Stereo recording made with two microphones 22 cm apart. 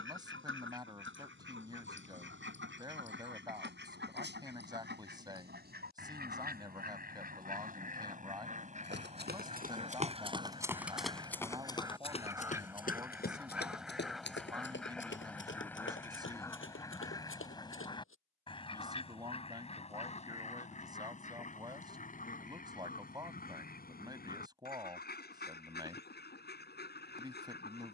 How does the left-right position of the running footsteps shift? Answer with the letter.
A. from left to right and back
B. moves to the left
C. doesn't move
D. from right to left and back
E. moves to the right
B.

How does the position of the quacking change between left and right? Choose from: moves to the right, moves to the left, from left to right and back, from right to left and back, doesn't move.
moves to the left.